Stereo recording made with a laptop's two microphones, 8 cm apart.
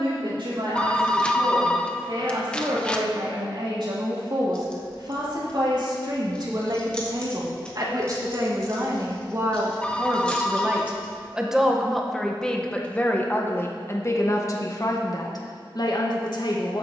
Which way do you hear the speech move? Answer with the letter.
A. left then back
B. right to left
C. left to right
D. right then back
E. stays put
B.